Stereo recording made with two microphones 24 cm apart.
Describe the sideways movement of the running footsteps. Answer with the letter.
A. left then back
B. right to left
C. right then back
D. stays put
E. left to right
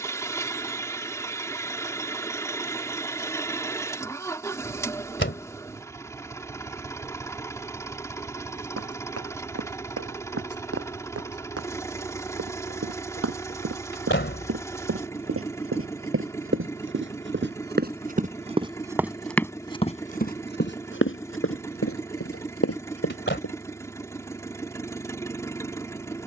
B.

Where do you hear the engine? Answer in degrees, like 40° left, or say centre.
10° left.